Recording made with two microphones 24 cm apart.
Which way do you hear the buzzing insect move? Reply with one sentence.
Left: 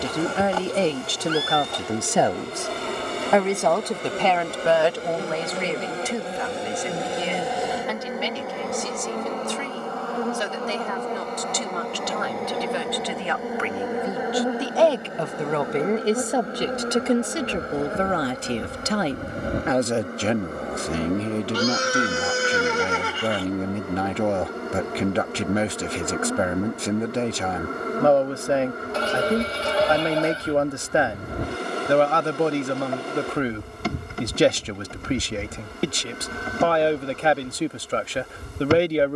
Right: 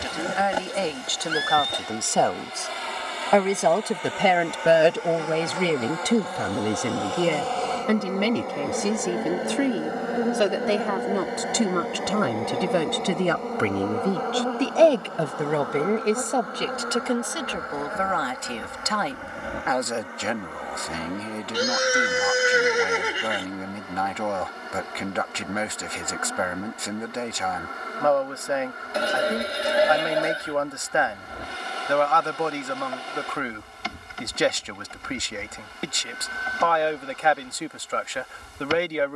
You can hear the buzzing insect move from left to right and back again.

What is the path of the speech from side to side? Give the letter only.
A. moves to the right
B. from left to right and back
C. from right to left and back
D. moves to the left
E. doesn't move
B.